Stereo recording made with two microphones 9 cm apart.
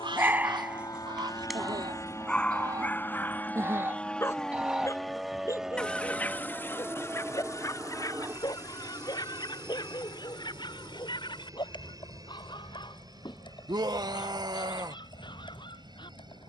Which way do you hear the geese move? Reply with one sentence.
You can hear the geese move to the left.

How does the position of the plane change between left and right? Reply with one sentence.
In this clip you hear the plane move from left to right.